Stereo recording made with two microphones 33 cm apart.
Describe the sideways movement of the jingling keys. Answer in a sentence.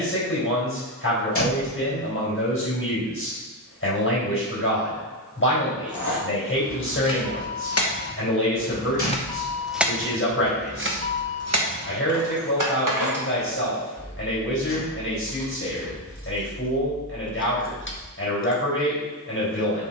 In this clip you hear the jingling keys move from left to right and back again.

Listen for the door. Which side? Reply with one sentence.
You can hear the door on the left.